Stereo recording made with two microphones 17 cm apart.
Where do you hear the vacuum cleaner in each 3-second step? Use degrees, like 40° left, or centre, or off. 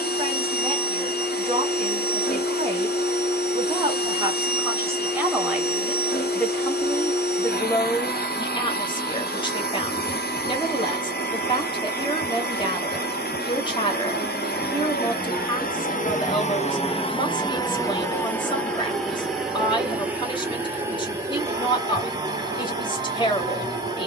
70° left, 70° left, 70° left, 70° left, 70° left, 40° left, centre, 20° right.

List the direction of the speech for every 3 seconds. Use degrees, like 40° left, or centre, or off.
30° right, 20° right, 20° left, 30° left, 30° left, 30° left, 30° left, 30° left.